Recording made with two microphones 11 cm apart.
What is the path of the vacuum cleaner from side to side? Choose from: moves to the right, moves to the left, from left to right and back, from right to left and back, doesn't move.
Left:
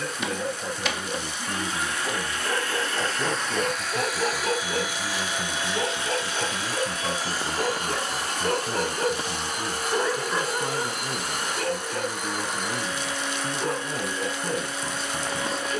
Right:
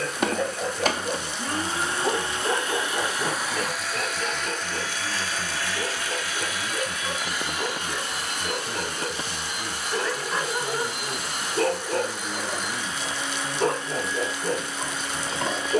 moves to the left.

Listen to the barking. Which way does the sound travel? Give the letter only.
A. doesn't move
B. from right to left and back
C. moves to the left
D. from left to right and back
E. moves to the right
B.